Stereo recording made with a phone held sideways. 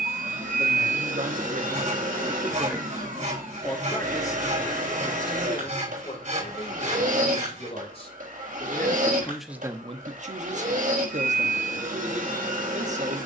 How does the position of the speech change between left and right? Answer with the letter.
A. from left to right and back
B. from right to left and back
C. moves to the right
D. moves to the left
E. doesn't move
B.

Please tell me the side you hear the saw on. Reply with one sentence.
In this clip you hear the saw on the right.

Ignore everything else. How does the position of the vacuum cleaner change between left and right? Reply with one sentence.
In this clip you hear the vacuum cleaner stay put.